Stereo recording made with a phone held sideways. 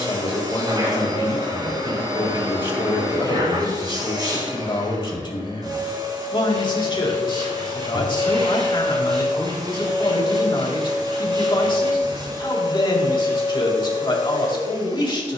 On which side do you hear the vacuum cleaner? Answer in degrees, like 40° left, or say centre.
30° right.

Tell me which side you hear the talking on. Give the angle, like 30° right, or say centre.
40° left.